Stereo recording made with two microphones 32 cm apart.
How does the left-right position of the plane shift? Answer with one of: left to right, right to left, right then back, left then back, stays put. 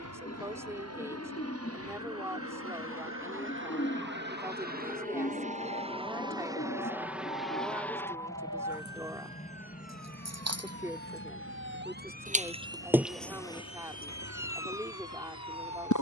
right to left.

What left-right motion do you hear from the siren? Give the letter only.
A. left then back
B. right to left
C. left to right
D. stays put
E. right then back
B.